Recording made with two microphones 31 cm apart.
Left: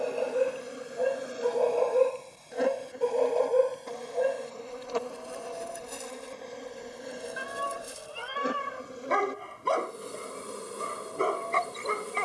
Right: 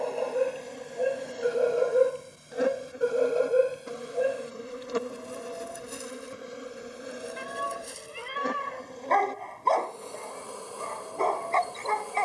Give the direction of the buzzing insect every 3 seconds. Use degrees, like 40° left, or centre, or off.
10° left, 20° right, centre, 20° left.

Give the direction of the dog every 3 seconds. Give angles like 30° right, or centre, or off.
10° right, 10° right, 10° left, 20° left.